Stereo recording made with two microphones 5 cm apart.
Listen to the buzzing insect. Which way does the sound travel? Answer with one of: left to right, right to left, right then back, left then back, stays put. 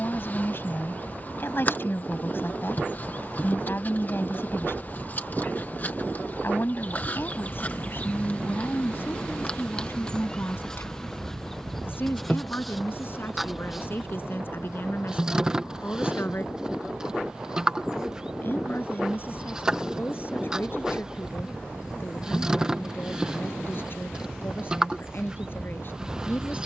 left to right.